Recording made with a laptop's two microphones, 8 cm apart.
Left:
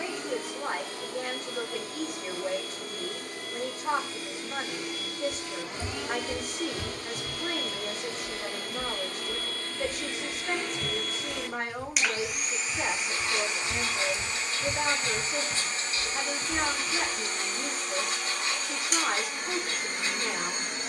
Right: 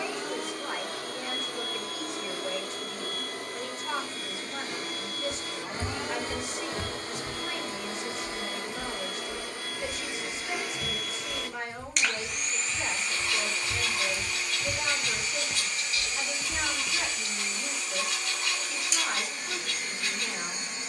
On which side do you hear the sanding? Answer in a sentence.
You can hear the sanding on the left.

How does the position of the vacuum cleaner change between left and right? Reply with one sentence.
In this clip you hear the vacuum cleaner move to the left.